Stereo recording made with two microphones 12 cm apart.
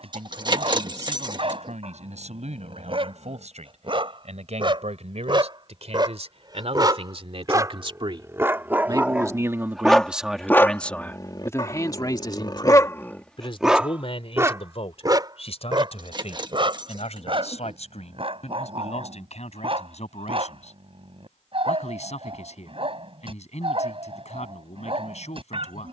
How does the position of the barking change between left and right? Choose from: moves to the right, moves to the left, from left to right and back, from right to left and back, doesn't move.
from right to left and back.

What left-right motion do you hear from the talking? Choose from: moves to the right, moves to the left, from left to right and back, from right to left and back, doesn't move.
moves to the left.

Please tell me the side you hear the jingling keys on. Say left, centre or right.
right.